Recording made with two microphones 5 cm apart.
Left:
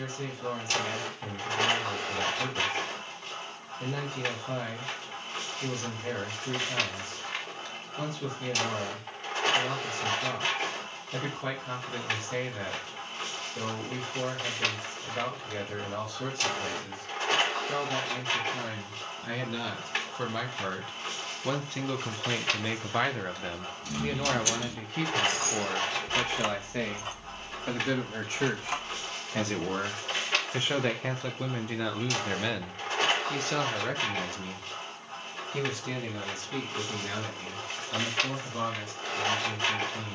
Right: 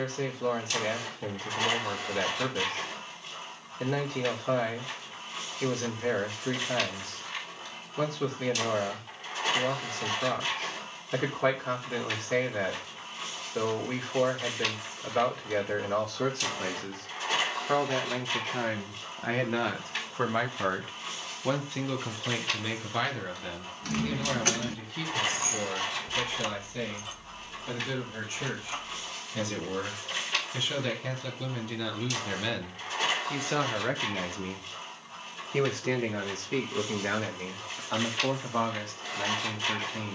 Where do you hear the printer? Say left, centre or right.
left.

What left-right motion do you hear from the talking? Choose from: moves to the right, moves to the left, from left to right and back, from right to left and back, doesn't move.
from right to left and back.